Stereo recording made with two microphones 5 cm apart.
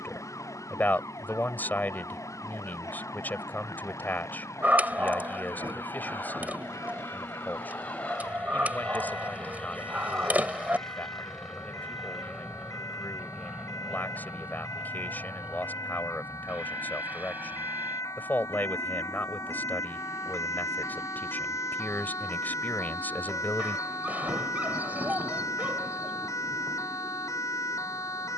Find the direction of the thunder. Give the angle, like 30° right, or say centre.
60° right.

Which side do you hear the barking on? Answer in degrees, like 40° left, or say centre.
30° right.